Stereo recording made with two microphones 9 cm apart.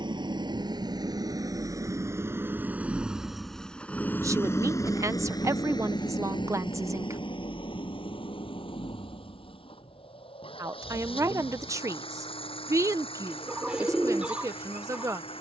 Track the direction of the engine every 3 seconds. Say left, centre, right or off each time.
right, left, left, left, left.